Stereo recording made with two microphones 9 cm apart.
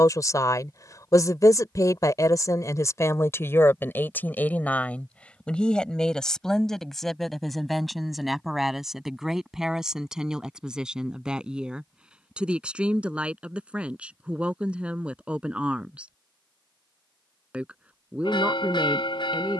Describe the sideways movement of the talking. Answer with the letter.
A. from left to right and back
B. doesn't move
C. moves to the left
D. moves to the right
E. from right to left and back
D.